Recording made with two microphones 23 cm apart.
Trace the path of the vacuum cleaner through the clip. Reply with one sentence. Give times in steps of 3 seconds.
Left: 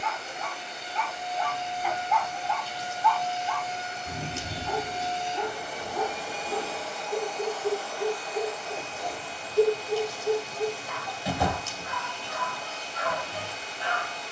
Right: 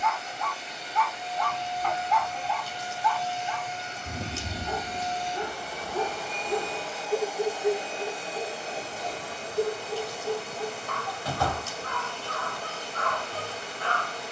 You can hear the vacuum cleaner on the left from 0 s, in the centre from 6 s and on the right from 9 s.